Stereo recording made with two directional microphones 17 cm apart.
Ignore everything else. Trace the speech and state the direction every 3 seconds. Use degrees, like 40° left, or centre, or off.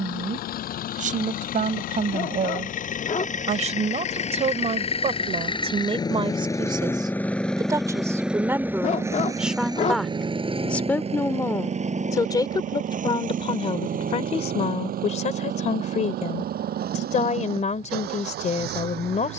50° right, 40° right, 20° right, 10° left, 30° left, 40° left, 40° left.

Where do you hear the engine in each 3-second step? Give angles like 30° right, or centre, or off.
60° left, 40° left, 10° left, 30° right, 50° right, 60° right, 70° right.